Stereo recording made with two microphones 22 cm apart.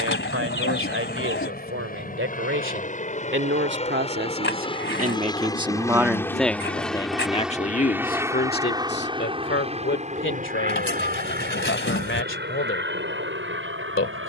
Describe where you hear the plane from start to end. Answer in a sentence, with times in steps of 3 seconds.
You can hear the plane on the left from 0 s, in the centre from 6 s and on the right from 9 s.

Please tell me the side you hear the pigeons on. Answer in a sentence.
You can hear the pigeons on the left.